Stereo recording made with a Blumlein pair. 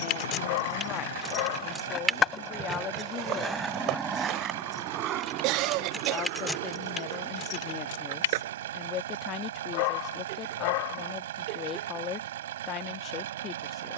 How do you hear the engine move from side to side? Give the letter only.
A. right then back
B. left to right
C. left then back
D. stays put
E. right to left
D.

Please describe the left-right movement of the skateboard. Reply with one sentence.
In this clip you hear the skateboard move to the right.